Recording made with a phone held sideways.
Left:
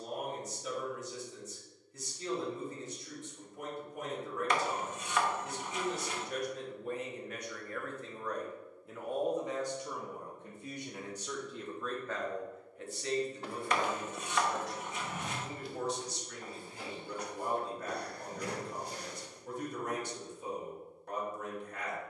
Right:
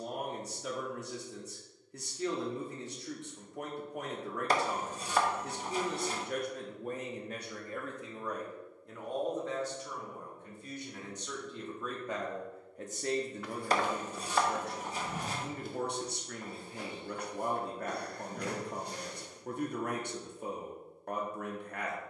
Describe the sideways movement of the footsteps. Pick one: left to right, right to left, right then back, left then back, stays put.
left to right.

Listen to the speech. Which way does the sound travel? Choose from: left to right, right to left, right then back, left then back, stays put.
left then back.